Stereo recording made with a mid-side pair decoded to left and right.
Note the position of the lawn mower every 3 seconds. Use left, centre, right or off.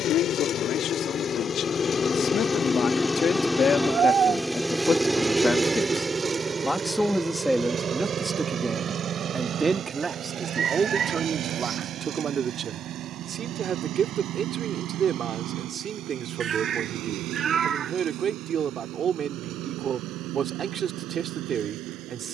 left, centre, right, right, right, right, right, right.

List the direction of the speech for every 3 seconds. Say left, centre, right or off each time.
left, left, centre, right, right, right, right, right.